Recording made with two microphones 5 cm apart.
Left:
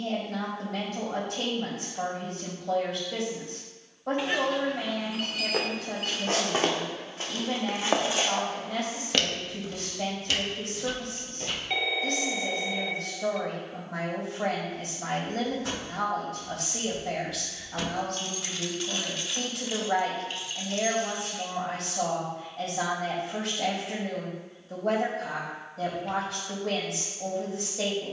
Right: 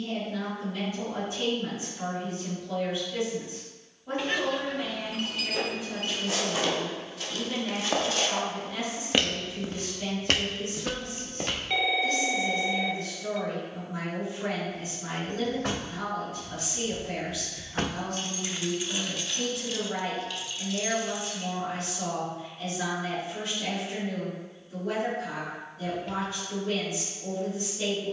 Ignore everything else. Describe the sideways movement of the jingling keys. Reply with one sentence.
In this clip you hear the jingling keys move from right to left.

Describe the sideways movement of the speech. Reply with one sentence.
You can hear the speech stay in one place.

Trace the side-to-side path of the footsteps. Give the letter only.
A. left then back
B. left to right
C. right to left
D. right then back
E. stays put
B.